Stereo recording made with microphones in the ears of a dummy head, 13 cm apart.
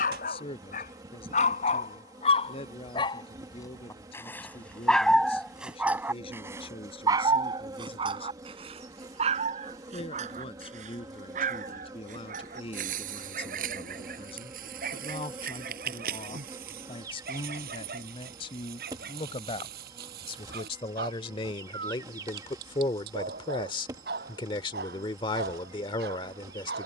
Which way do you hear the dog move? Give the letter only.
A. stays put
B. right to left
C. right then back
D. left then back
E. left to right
E.